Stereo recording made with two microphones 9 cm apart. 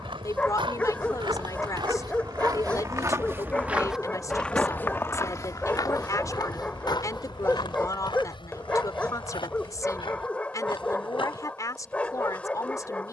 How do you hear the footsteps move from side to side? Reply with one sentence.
In this clip you hear the footsteps move from right to left.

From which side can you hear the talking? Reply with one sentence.
You can hear the talking on the left.